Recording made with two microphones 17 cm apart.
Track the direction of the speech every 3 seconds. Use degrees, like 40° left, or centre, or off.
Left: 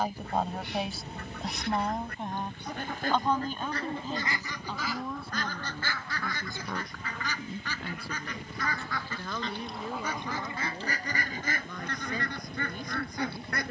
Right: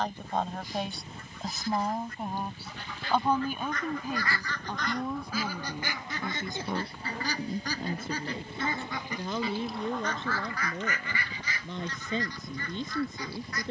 centre, 10° right, 20° right, 20° right, 20° right.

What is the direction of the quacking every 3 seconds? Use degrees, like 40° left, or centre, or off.
60° left, 10° left, 30° right, 20° left, 60° left.